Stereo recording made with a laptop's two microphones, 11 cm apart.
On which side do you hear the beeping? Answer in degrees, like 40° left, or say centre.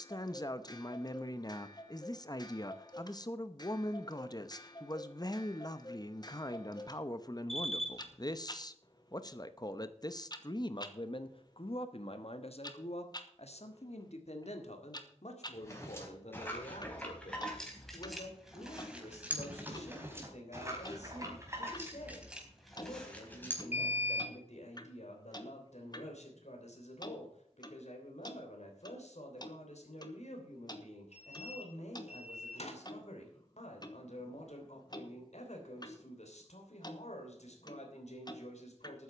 70° left.